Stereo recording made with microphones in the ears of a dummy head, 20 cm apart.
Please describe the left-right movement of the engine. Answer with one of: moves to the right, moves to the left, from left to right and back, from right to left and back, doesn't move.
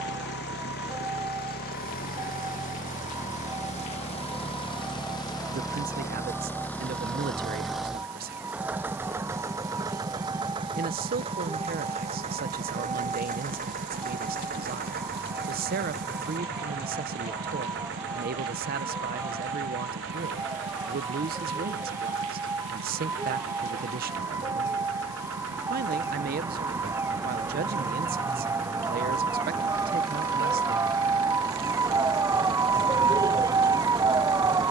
moves to the right.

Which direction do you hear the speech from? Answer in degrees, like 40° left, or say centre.
40° right.